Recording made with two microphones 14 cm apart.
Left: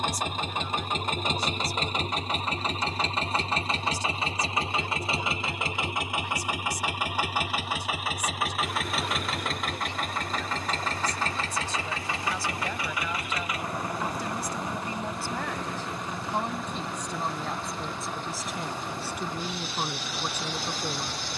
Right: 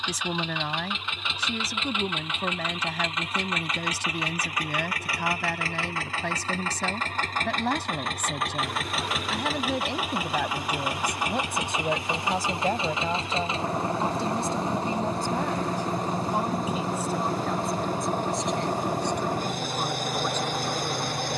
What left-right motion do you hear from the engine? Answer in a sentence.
You can hear the engine go from the left side to the right.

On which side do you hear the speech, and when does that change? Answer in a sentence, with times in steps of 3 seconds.
You can hear the speech on the right from 0 s and in the centre from 15 s.